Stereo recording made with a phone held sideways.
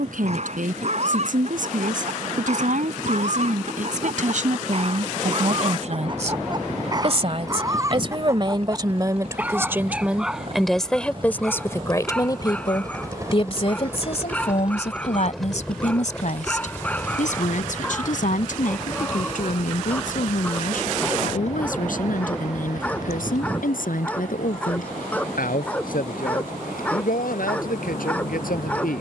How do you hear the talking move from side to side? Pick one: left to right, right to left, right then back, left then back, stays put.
right to left.